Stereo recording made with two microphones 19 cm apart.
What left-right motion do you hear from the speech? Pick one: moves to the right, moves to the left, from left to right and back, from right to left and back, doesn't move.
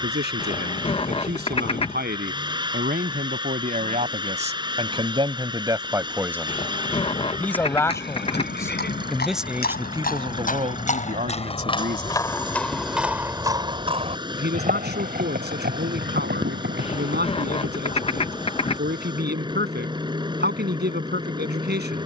from right to left and back.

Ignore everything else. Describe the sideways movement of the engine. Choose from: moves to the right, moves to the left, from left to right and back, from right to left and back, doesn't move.
doesn't move.